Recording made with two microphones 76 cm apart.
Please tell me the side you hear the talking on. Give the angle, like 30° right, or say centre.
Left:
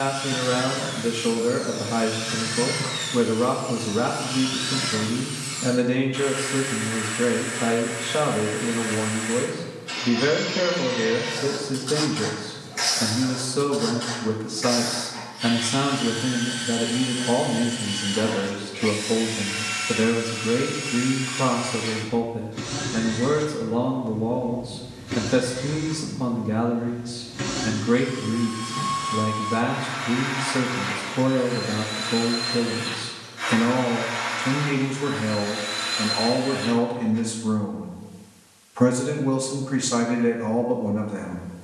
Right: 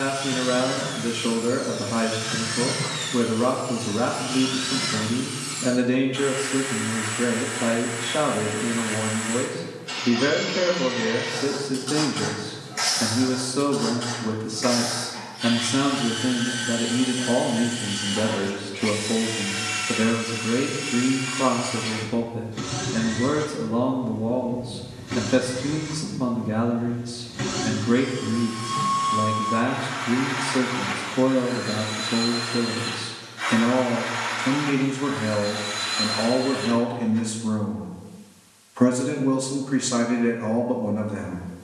20° left.